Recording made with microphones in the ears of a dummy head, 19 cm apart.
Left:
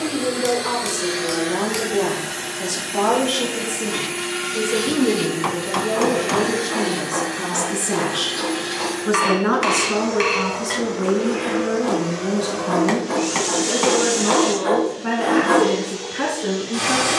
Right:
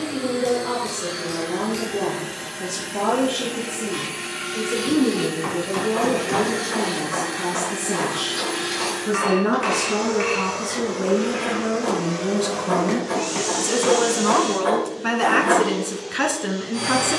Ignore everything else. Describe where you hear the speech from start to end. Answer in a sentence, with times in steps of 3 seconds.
You can hear the speech on the left from 0 s, in the centre from 9 s and on the right from 12 s.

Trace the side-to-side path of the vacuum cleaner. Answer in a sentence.
You can hear the vacuum cleaner go right and come back.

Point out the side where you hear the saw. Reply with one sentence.
You can hear the saw in the centre.